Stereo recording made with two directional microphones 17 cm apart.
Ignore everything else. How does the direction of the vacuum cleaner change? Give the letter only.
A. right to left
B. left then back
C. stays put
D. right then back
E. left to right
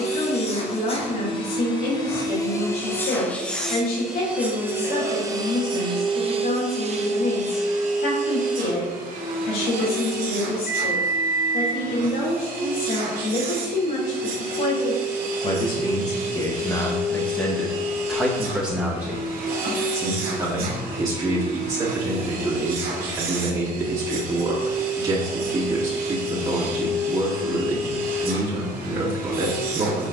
E.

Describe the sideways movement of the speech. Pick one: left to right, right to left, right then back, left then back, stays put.
left to right.